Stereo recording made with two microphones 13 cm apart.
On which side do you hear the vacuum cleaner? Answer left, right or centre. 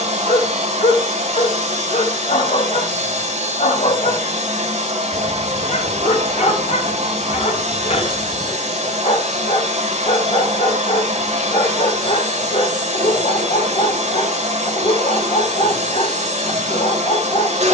right.